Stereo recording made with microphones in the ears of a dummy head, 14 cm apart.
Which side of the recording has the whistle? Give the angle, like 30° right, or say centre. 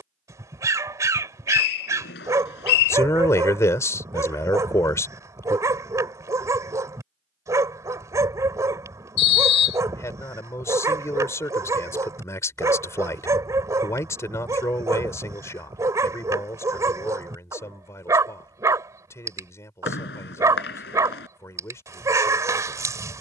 70° left.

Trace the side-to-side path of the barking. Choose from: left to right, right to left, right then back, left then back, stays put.
stays put.